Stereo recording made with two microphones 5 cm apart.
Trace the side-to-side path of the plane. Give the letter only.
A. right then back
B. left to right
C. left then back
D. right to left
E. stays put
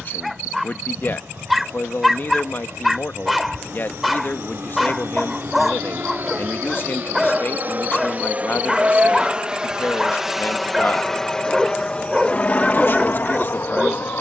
D.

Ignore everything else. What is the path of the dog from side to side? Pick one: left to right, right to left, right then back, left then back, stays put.
stays put.